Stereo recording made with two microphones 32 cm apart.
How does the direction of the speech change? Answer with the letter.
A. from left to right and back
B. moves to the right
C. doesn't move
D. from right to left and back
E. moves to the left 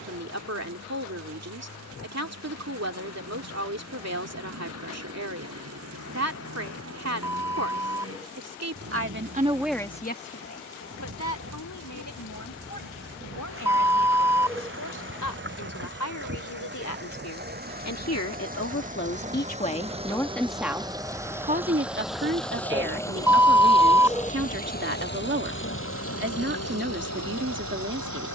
D.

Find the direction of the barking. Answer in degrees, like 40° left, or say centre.
10° right.